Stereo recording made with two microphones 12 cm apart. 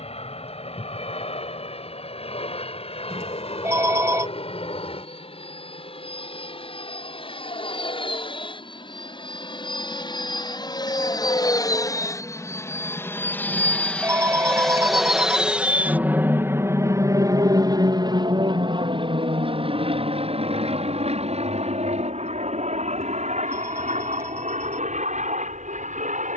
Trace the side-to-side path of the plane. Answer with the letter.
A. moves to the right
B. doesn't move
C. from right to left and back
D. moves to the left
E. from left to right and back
A.